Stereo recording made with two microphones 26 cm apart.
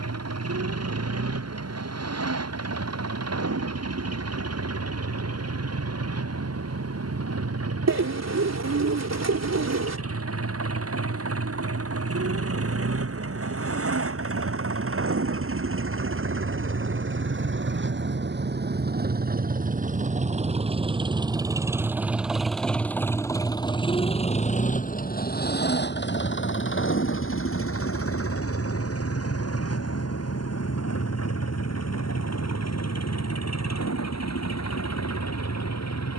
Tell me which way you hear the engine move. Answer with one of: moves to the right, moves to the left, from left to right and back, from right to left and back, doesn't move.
moves to the left.